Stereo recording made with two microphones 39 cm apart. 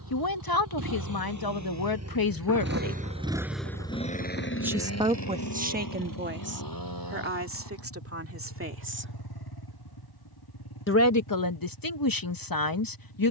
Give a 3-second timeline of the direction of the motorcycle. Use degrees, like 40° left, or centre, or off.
50° right, 30° left, 70° left, 80° left, 80° left.